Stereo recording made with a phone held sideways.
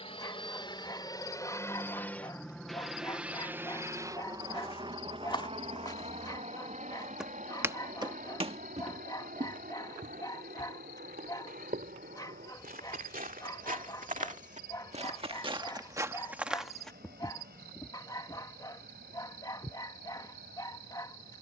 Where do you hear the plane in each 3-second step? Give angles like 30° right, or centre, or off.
20° left, 30° right, 50° right, 60° right, 70° right, 70° right, 80° right.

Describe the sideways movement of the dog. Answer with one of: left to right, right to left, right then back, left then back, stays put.
stays put.